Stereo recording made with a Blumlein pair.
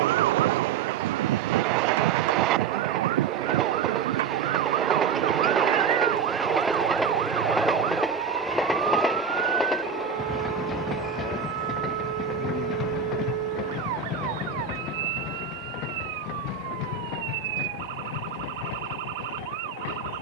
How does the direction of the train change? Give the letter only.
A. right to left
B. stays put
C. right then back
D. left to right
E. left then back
A.